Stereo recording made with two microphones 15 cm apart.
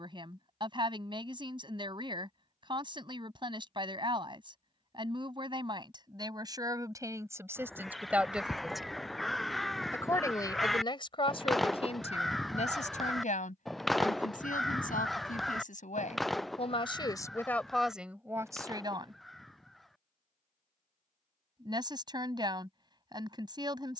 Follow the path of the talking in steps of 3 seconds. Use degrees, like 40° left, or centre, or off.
40° right, 40° right, 20° right, 30° left, 60° left, 40° left, 20° right, 30° right.